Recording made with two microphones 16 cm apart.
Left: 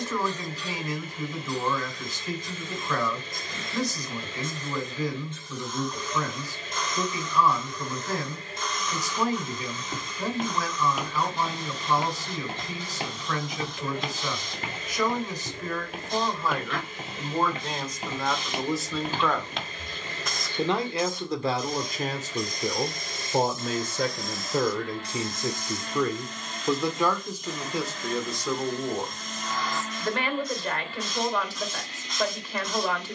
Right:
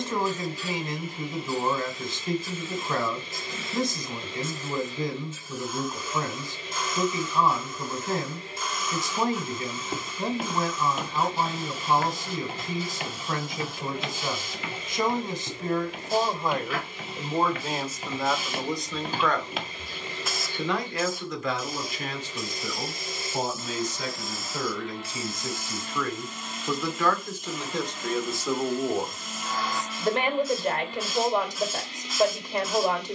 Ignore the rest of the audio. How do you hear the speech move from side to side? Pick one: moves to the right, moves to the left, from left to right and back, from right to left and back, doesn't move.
from right to left and back.